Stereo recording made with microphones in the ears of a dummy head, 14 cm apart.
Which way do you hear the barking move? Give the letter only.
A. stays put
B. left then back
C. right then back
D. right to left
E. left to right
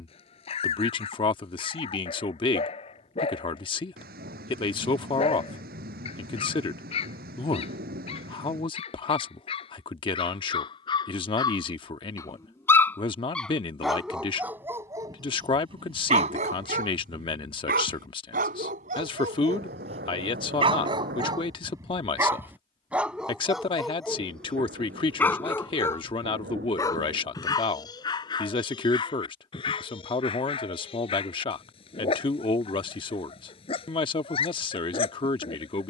C.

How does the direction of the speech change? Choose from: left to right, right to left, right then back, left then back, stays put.
stays put.